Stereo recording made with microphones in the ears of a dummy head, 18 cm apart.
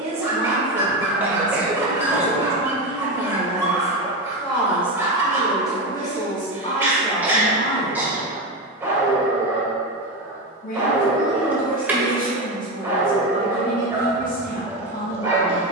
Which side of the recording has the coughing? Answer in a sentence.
In this clip you hear the coughing in the centre.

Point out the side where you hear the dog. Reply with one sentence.
You can hear the dog in the centre.